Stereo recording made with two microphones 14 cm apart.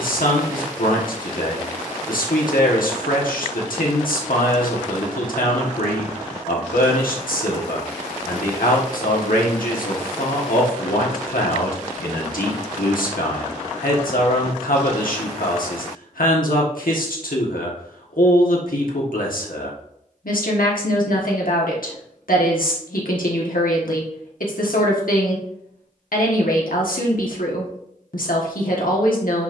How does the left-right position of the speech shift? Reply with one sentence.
You can hear the speech stay put.